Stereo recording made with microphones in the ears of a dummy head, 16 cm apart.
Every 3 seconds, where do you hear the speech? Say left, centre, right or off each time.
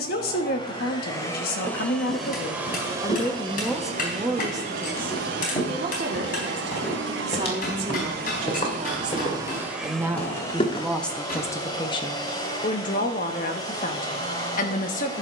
left, centre, right, centre, left.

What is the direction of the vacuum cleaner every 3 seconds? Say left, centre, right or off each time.
centre, right, right, centre, left.